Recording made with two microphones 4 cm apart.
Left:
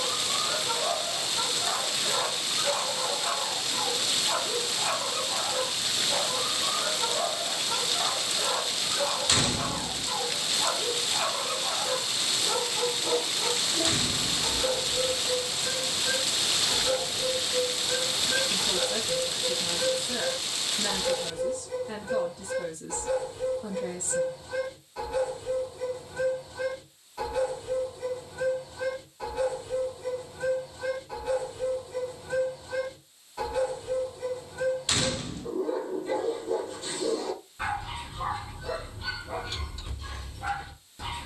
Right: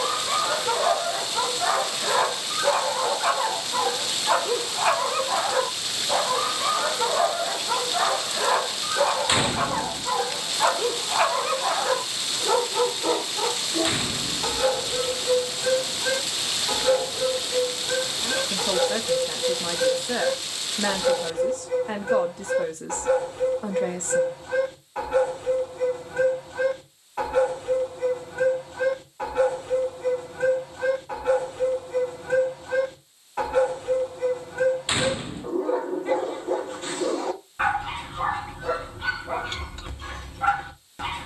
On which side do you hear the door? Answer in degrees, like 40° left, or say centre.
20° right.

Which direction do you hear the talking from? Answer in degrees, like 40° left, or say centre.
60° right.